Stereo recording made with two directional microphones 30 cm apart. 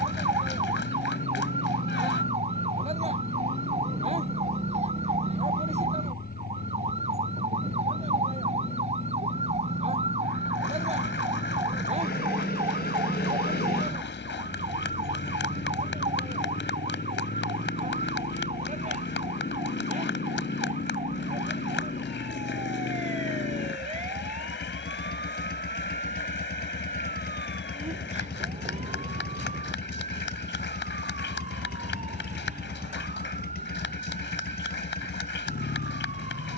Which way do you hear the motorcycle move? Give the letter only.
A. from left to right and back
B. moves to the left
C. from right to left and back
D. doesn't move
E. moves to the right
D.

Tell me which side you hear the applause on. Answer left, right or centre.
left.